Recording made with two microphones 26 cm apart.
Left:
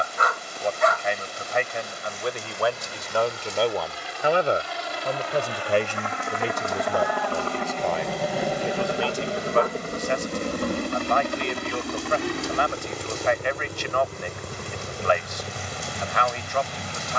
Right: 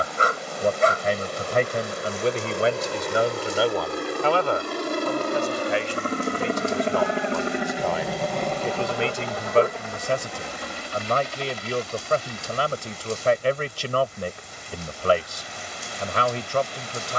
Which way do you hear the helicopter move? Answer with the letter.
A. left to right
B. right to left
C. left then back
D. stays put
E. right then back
B.